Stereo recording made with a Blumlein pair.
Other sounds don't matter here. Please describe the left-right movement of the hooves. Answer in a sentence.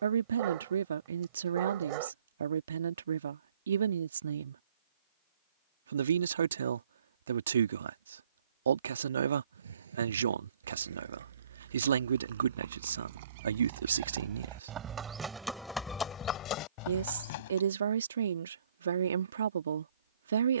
In this clip you hear the hooves travel towards the left.